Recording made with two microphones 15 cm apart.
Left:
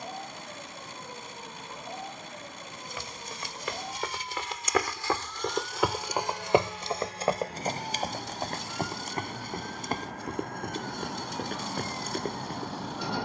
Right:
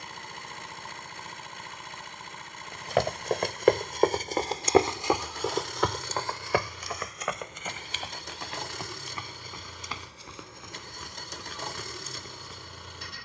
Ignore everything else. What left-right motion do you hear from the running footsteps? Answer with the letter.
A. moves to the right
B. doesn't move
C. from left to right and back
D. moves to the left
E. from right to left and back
D.